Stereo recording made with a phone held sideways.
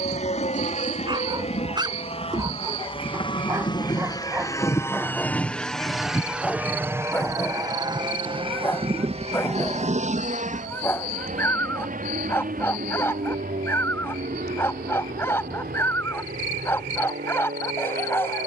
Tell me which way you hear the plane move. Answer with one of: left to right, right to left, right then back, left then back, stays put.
left to right.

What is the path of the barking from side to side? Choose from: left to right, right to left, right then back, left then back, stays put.
right to left.